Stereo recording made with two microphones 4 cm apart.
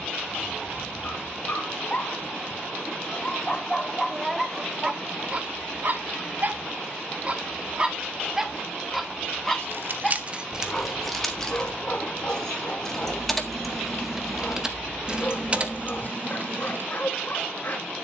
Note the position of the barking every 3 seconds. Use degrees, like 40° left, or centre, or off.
40° left, 10° right, 30° right, 20° left, 40° left, 40° left.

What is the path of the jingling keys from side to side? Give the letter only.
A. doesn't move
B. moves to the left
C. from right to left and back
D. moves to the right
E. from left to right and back
C.